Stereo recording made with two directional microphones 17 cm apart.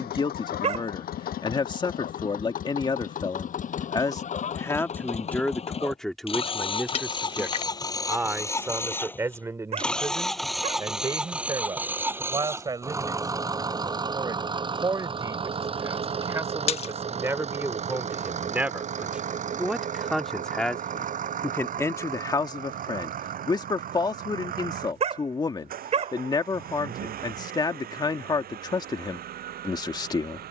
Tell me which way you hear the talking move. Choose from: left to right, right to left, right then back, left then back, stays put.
right then back.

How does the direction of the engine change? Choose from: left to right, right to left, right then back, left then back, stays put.
left to right.